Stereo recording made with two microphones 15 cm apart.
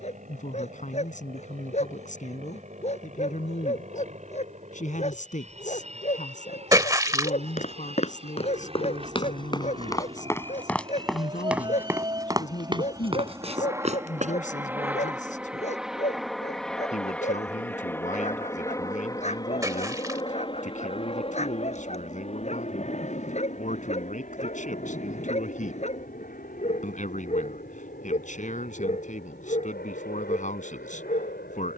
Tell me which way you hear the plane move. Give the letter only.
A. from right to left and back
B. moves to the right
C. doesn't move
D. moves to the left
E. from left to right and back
D.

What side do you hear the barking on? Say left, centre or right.
left.